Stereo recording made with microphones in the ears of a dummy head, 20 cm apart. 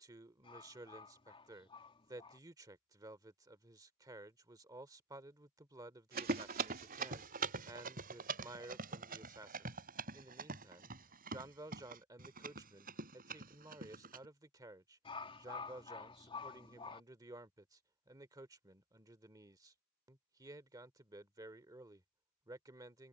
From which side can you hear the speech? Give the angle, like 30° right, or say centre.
20° right.